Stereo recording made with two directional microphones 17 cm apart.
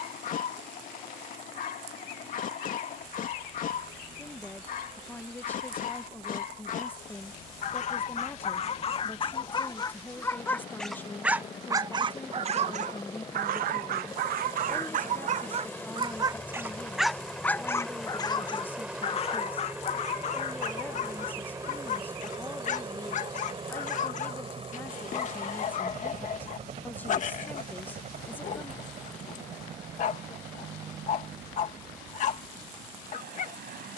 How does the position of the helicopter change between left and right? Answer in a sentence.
You can hear the helicopter move from left to right.